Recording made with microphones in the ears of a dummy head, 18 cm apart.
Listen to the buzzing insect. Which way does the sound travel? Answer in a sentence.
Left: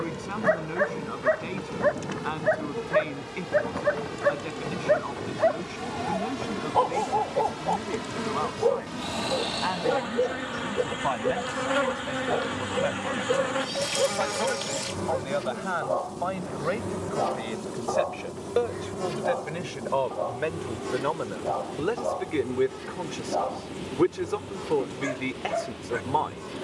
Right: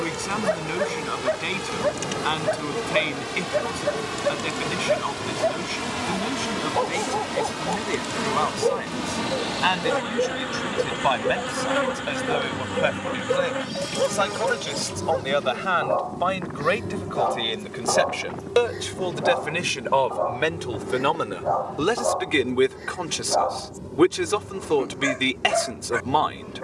In this clip you hear the buzzing insect move to the left.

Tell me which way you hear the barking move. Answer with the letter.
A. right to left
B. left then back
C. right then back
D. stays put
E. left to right
E.